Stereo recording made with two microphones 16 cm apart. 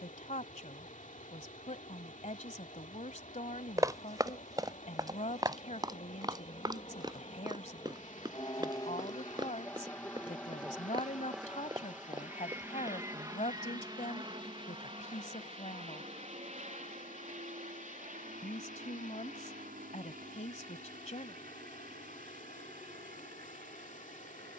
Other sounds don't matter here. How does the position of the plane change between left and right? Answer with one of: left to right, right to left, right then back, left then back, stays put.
left to right.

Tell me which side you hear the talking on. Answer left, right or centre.
left.